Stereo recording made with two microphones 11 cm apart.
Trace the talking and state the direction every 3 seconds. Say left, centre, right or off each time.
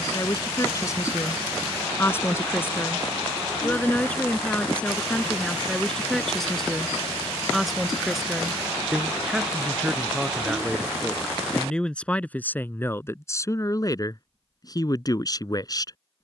left, centre, centre, centre, left, left.